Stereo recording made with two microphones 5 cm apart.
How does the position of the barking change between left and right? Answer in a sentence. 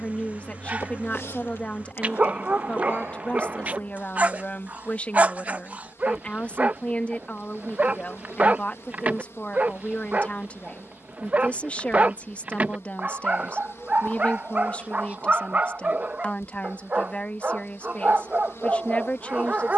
In this clip you hear the barking stay put.